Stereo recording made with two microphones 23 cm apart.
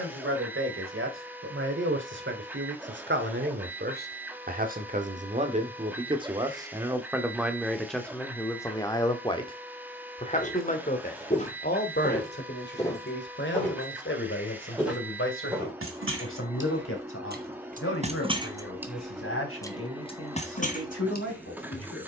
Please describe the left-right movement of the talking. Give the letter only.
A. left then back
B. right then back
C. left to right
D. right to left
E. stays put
D.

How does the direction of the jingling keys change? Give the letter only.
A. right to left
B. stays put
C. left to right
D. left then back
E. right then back
A.